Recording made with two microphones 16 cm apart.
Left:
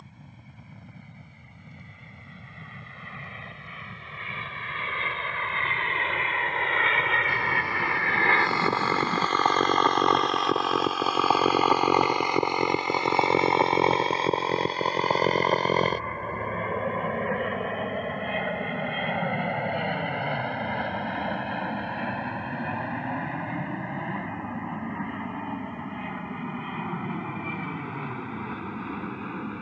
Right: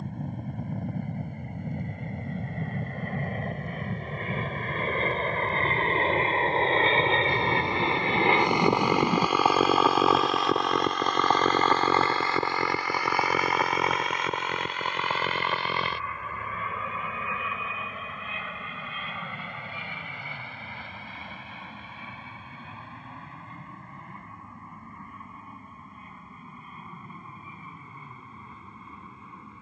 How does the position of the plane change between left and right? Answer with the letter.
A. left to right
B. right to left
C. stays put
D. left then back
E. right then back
B.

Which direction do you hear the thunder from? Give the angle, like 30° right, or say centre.
20° right.